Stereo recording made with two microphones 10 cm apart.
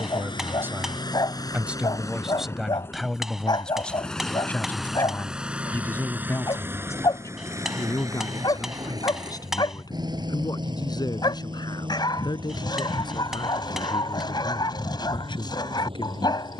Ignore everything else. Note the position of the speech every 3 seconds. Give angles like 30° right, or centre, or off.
10° right, 10° left, 30° left, 40° left, 50° left, 50° left.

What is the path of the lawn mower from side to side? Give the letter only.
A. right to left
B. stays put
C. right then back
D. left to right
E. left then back
D.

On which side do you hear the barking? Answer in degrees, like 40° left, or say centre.
40° left.